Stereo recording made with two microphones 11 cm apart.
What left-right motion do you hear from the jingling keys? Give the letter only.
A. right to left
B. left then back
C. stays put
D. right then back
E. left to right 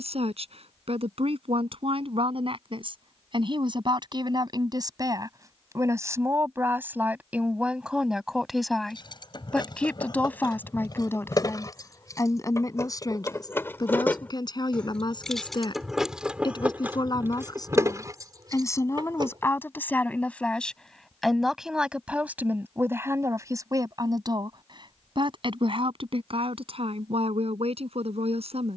E.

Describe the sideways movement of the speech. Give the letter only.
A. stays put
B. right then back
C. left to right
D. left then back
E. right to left
D.